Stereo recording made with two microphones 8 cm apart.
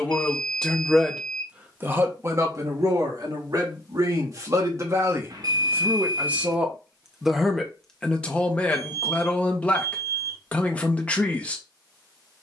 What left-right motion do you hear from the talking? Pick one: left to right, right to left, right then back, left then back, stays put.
right then back.